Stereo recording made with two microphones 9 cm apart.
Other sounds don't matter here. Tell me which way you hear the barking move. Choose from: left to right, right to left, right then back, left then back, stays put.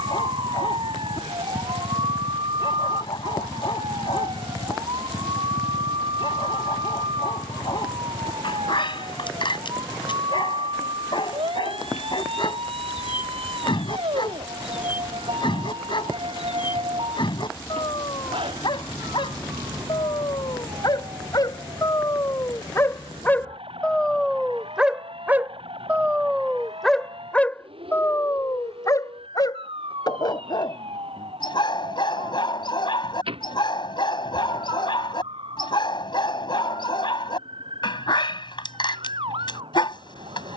right then back.